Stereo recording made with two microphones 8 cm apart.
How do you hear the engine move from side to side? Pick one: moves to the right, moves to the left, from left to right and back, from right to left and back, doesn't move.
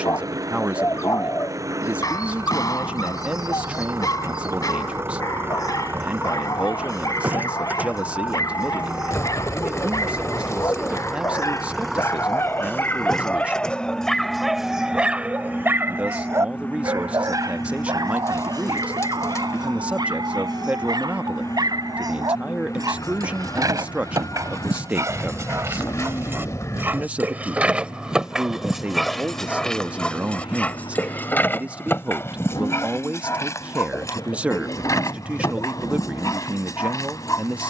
moves to the left.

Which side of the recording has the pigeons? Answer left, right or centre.
left.